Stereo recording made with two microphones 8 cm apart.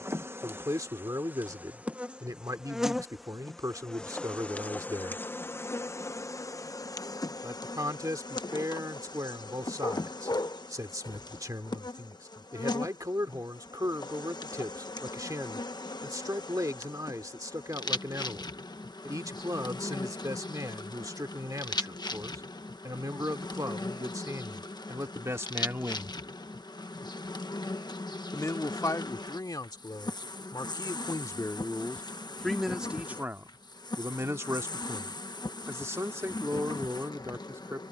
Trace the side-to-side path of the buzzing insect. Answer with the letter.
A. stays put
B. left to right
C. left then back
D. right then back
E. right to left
E.